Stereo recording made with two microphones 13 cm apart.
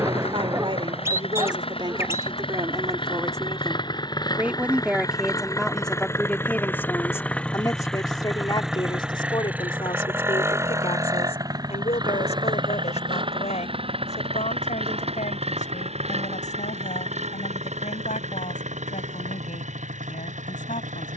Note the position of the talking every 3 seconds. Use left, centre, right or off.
right, centre, left, left, left, left, left.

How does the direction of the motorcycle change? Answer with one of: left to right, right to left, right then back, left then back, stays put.
left to right.